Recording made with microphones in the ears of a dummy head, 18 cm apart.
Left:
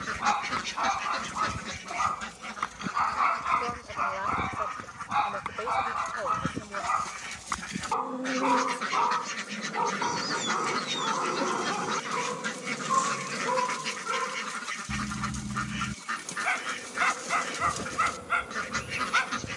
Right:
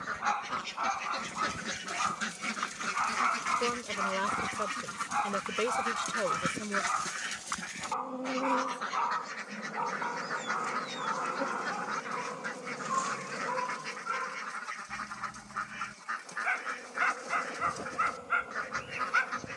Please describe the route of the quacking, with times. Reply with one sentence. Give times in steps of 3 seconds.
In this clip you hear the quacking in the centre from 0 s, on the right from 3 s, in the centre from 6 s and on the left from 9 s.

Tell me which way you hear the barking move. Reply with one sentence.
You can hear the barking stay put.